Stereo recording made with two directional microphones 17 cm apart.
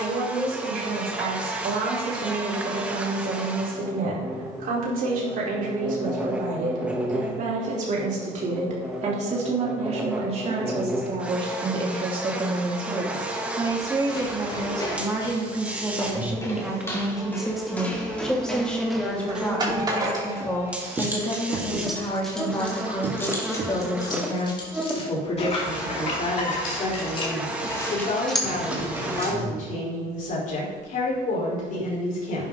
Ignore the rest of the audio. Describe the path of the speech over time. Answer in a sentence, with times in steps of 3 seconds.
You can hear the speech on the right from 0 s, in the centre from 15 s and on the left from 21 s.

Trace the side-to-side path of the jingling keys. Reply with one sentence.
You can hear the jingling keys go left and come back.